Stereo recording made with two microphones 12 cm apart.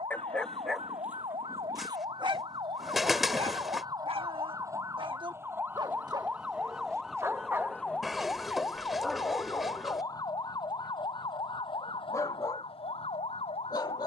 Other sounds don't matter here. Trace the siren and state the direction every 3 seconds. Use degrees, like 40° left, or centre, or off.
50° right, 30° right, centre, 30° left, 50° left.